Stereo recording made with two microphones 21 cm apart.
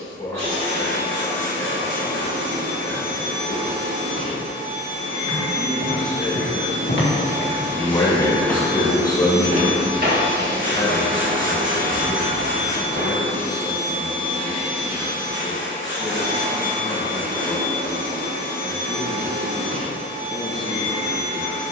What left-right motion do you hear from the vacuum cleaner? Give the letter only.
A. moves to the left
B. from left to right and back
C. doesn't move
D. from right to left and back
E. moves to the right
C.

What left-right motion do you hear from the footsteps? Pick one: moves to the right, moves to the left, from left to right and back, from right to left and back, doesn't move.
moves to the right.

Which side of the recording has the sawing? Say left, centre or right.
right.